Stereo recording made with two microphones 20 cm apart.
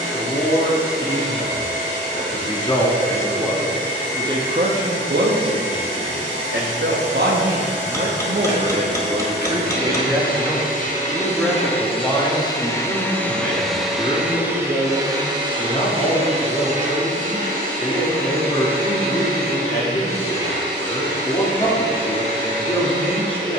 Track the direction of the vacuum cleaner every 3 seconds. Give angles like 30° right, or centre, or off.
80° left, 70° left, 60° left, 40° left, centre, 30° right, 50° right, 60° right.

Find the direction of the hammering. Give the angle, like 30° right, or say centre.
10° left.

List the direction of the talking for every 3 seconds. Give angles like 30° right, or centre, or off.
20° left, 30° right, 50° right, 10° right, 20° left, 20° left, 20° left, 20° left.